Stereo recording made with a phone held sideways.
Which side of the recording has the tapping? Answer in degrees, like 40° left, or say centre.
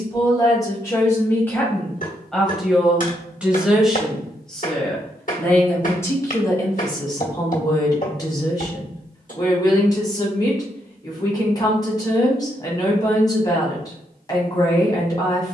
50° left.